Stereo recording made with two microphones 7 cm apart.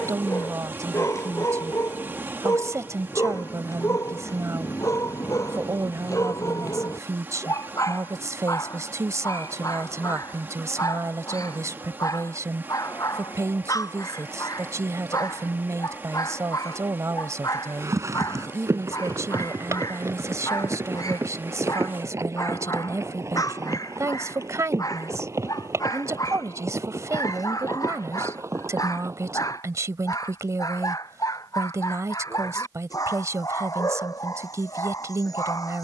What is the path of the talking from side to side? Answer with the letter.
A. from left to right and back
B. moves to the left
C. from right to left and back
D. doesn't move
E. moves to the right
D.